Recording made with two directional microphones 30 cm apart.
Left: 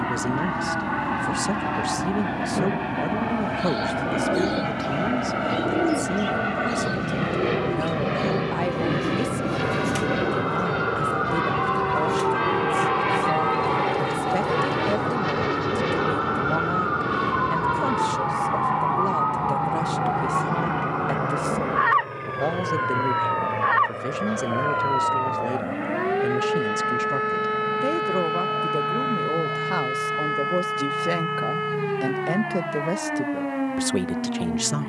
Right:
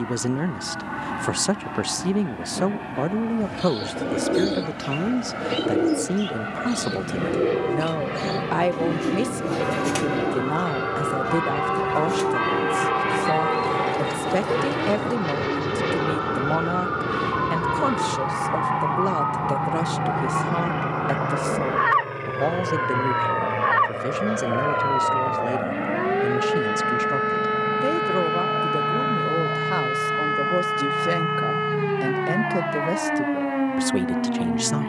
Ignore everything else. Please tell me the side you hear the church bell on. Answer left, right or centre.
centre.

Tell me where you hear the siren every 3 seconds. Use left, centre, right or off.
left, left, left, left, left, left, centre, centre, right, right, right, right.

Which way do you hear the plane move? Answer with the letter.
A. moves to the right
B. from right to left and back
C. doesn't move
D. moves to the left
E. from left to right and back
A.